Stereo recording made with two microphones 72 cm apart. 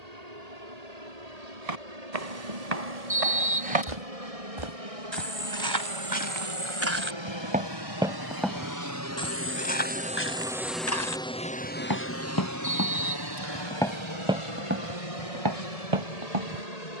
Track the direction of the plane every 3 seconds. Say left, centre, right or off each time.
right, right, right, centre, left, left.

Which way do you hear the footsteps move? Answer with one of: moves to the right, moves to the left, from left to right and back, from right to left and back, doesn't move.
from right to left and back.